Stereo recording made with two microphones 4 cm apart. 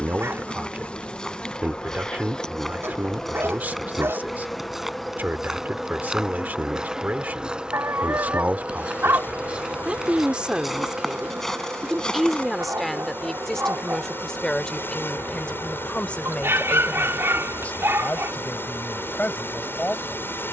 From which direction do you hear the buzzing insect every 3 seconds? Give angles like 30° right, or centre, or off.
20° left, 10° left, 20° right, 40° right, 60° right, 70° right, 70° right.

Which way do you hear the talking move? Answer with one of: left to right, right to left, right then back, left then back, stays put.
right to left.